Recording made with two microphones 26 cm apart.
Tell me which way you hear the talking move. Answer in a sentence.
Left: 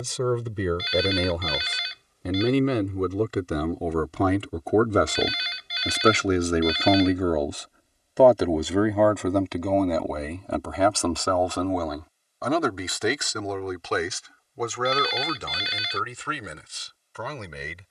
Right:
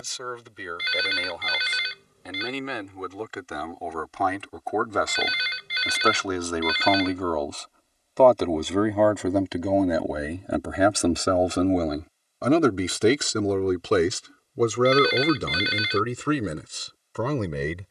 You can hear the talking go from the left side to the right.